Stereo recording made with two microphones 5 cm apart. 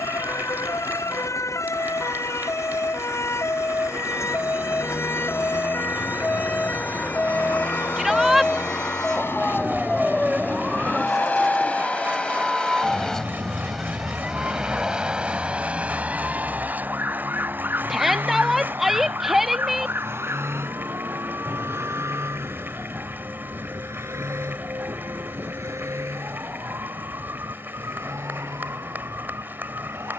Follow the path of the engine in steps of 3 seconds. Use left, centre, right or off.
left, left, left, left, centre, right, right, right, right, right.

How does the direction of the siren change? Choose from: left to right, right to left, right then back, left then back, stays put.
left to right.